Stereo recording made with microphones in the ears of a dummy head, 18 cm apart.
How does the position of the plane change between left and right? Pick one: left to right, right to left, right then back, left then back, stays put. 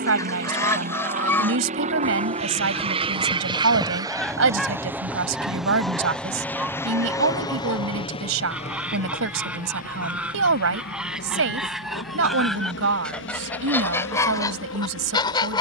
right to left.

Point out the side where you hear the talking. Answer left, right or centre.
right.